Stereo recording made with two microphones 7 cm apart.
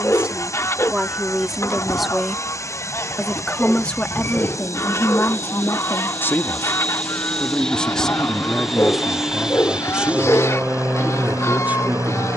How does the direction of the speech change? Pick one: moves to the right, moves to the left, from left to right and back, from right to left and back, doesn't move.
from right to left and back.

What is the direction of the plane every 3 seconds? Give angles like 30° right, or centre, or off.
40° left, 30° left, 10° left, 20° right.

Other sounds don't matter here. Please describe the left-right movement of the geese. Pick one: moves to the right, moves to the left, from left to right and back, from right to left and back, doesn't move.
doesn't move.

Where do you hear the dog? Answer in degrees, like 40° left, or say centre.
30° left.